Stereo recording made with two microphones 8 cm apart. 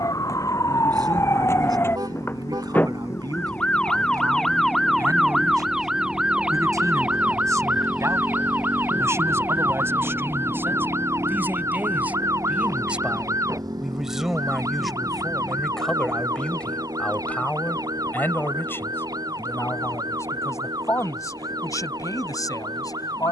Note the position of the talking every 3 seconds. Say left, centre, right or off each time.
right, right, right, right, centre, centre, left, left.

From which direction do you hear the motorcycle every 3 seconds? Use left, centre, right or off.
left, left, centre, right, right, right, right, right.